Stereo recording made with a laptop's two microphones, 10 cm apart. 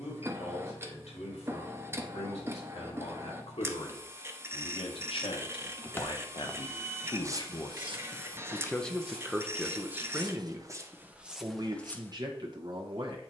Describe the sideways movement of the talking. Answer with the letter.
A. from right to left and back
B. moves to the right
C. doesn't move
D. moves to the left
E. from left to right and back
B.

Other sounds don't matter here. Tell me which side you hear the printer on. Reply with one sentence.
In this clip you hear the printer on the right.